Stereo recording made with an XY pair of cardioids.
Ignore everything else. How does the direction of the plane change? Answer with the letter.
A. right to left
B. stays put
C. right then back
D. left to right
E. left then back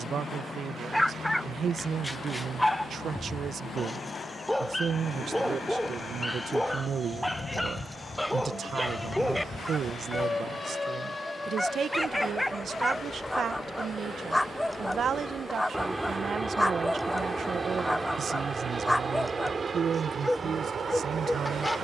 D.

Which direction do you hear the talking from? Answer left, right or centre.
right.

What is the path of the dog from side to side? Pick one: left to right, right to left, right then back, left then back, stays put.
stays put.